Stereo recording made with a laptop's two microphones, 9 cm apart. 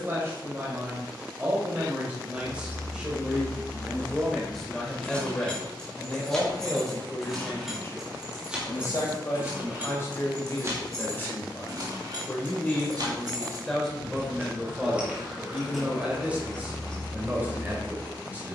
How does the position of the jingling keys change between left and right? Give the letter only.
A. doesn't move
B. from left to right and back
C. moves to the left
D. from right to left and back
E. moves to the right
B.